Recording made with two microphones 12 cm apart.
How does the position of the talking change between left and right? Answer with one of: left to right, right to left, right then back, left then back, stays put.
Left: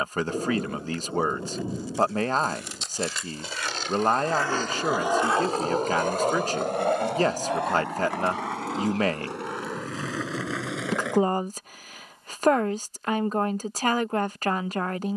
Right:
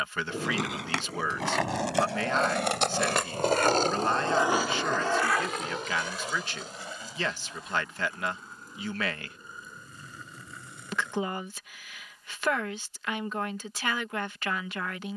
stays put.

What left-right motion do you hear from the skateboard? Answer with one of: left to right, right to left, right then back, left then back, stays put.
right to left.